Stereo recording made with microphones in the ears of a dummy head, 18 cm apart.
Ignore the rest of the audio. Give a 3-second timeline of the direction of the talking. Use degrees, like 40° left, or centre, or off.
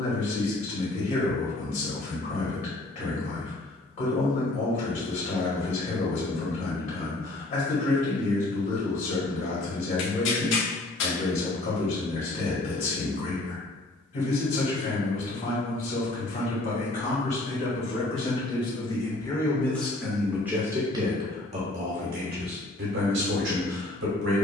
40° left, 40° left, 40° left, 40° left, 40° left, 40° left, 10° left, 50° right.